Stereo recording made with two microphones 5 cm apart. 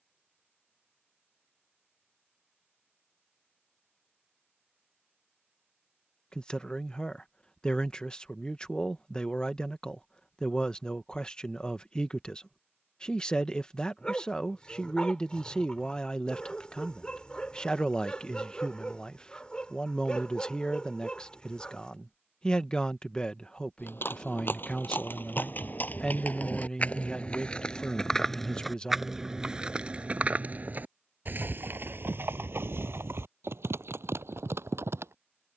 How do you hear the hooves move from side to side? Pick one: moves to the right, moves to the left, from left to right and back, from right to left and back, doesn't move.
moves to the right.